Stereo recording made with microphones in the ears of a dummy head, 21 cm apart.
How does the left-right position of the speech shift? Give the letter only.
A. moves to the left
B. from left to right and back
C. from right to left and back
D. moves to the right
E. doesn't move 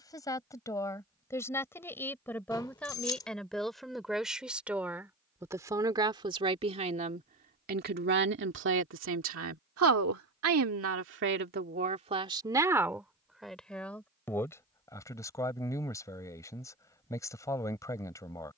B.